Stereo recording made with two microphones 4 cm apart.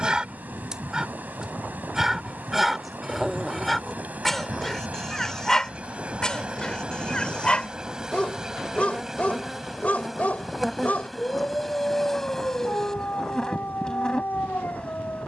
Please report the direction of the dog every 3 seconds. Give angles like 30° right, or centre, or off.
10° right, centre, 20° left, 30° left, 40° left.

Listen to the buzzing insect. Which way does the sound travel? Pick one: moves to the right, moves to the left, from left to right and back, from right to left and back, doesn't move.
moves to the left.